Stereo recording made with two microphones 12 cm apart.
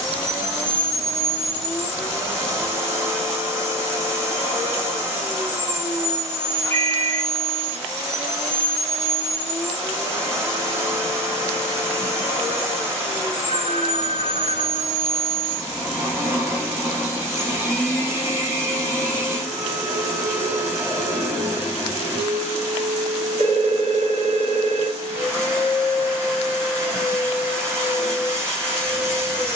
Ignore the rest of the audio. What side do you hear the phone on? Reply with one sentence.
You can hear the phone on the right.